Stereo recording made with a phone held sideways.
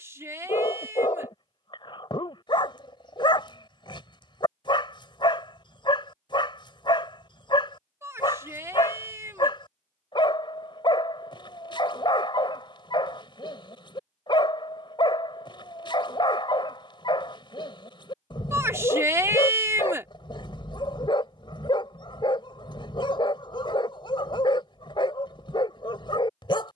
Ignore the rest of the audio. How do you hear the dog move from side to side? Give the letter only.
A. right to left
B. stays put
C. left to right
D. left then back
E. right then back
B.